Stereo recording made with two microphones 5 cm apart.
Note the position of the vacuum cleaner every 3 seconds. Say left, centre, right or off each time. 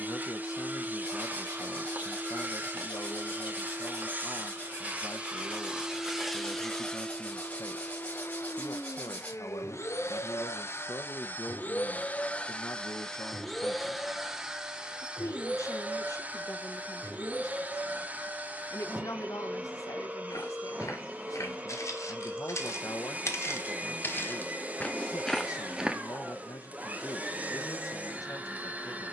right, right, left, left, centre, right, right, right, right, right.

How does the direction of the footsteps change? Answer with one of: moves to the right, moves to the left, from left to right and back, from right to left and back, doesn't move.
moves to the right.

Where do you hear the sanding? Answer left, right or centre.
left.